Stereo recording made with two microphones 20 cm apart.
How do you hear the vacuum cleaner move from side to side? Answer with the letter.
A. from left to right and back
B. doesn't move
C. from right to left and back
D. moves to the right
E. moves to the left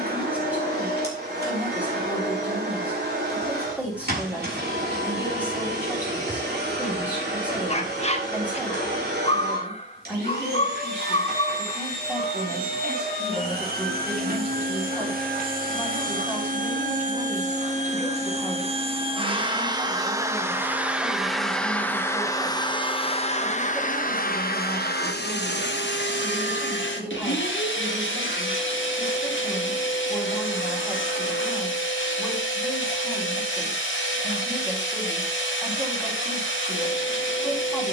E.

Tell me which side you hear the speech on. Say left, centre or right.
centre.